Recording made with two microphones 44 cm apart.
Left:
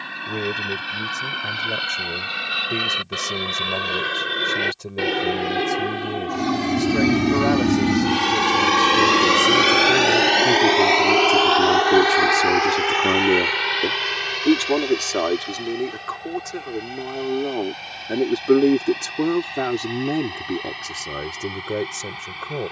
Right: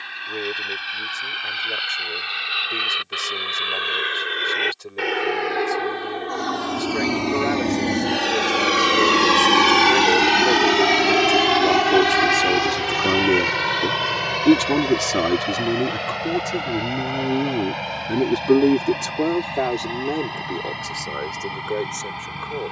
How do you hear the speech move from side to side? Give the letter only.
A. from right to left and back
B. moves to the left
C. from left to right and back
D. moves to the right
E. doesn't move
C.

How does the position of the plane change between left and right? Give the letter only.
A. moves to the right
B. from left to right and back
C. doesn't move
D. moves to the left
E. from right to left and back
A.